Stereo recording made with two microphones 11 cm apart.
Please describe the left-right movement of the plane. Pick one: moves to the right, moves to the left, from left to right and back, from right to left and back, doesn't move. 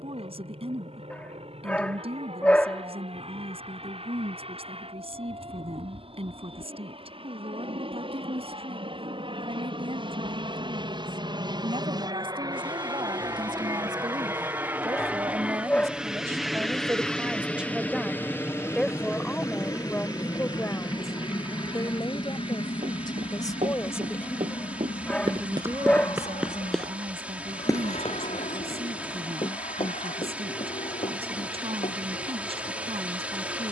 moves to the left.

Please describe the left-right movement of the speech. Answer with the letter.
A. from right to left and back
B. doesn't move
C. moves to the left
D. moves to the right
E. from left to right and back
A.